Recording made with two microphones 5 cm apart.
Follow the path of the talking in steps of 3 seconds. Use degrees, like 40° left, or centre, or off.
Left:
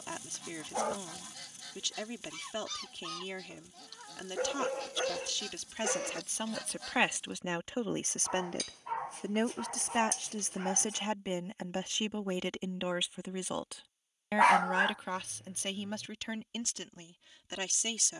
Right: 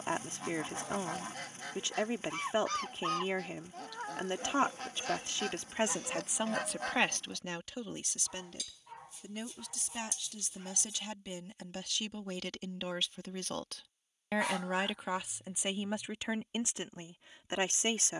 30° right, 30° right, 10° left, 40° left, 10° left, 20° right.